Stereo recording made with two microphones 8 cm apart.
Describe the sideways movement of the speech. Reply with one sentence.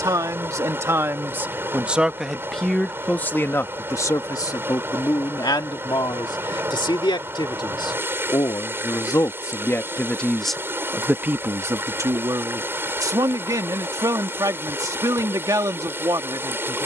In this clip you hear the speech move from right to left and back again.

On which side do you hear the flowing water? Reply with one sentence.
You can hear the flowing water on the right.